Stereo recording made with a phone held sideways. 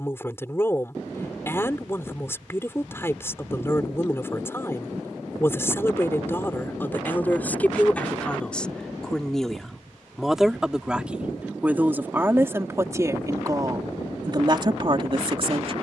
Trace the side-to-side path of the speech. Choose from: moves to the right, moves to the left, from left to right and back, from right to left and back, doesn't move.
moves to the right.